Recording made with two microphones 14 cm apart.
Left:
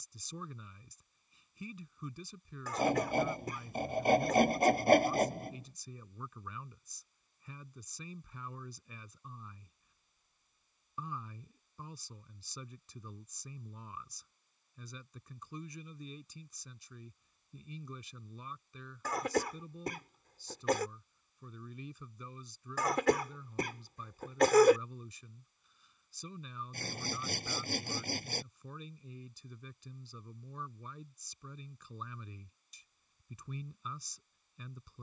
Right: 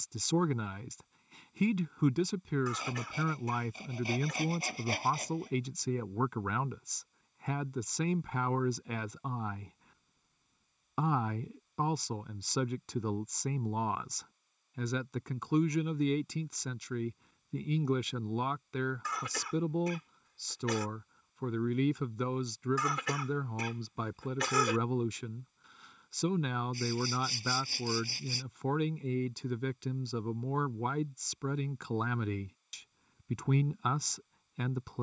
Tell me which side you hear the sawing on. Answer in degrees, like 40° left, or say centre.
50° left.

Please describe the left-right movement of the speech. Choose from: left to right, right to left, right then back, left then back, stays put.
stays put.